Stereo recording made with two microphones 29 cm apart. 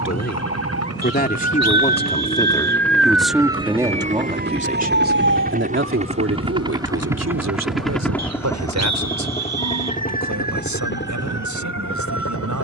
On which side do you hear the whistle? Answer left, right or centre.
right.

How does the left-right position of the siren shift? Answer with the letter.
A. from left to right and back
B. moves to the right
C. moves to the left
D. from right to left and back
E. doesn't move
B.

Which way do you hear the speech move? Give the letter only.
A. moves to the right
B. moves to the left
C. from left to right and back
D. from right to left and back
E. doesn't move
A.